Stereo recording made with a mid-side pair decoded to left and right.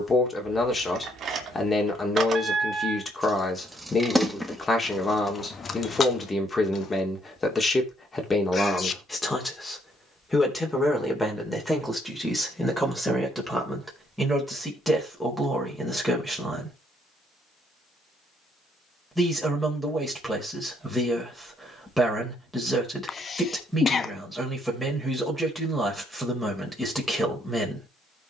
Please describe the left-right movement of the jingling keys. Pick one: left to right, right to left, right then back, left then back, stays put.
right to left.